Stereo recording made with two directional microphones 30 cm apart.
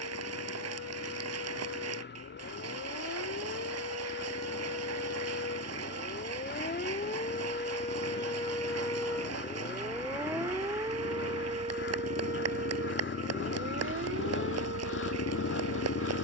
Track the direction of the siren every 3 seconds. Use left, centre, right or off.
left, left, left, centre, right, right.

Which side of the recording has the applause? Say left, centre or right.
right.